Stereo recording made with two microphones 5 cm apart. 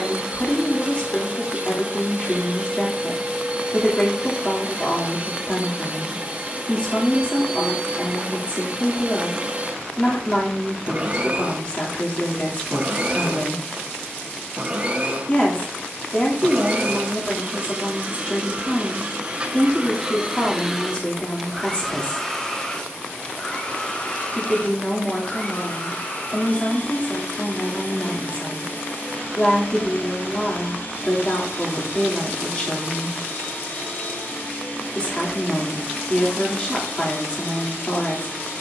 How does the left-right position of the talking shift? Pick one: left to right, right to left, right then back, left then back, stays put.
stays put.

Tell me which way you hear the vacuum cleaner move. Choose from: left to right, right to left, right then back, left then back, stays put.
right to left.